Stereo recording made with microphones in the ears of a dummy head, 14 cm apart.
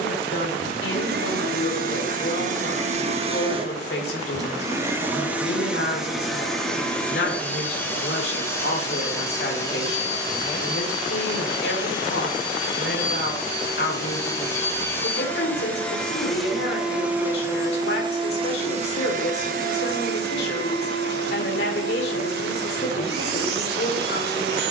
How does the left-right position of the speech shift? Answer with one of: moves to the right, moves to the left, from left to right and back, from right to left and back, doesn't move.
doesn't move.